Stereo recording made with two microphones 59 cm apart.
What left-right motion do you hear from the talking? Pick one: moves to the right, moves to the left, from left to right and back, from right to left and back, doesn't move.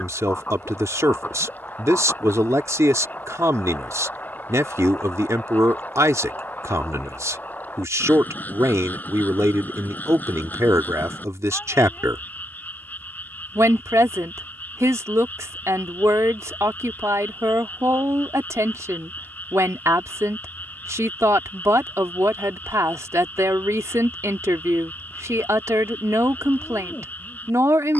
doesn't move.